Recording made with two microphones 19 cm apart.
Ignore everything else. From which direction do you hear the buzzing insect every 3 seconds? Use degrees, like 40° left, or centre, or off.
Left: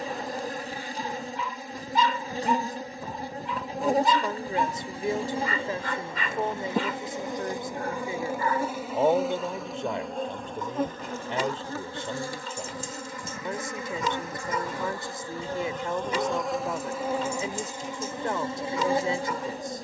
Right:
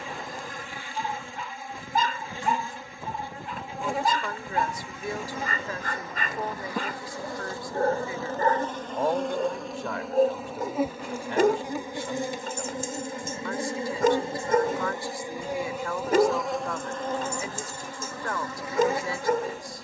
40° left, 40° left, 20° left, 10° right, 20° right, centre, 30° left.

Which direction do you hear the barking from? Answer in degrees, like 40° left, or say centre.
50° right.